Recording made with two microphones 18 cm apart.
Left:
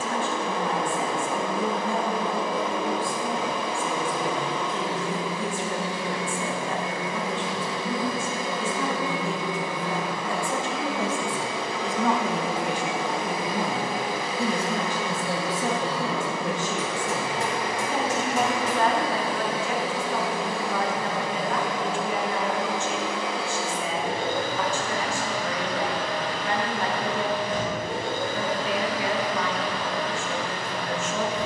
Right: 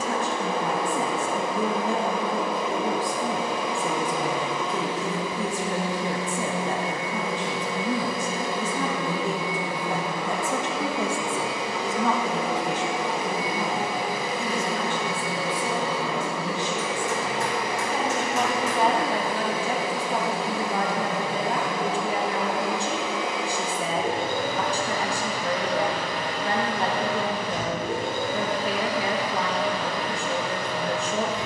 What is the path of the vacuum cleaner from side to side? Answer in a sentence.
In this clip you hear the vacuum cleaner stay in one place.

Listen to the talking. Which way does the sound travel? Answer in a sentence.
You can hear the talking go left and come back.